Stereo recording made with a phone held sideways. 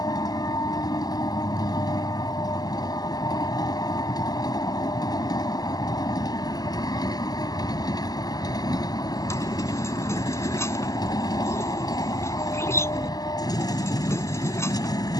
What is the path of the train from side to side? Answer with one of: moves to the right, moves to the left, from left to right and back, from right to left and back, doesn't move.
doesn't move.